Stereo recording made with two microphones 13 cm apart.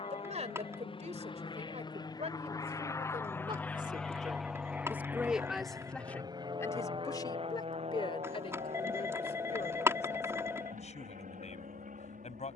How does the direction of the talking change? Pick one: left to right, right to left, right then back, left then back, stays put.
right to left.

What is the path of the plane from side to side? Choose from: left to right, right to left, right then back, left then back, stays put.
left to right.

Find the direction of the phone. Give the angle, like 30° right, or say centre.
20° right.